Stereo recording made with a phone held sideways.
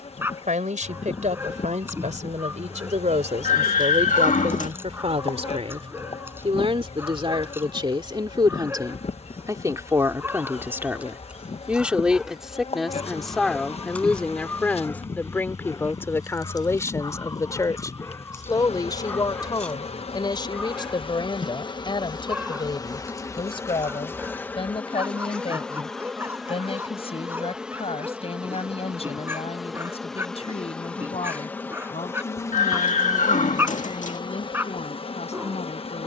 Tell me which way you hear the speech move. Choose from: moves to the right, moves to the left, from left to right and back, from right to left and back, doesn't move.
moves to the left.